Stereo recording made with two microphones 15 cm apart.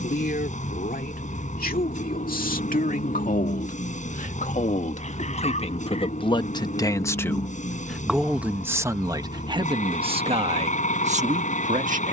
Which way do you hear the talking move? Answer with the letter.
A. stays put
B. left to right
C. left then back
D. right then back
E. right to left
B.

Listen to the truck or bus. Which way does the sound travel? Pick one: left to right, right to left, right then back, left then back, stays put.
stays put.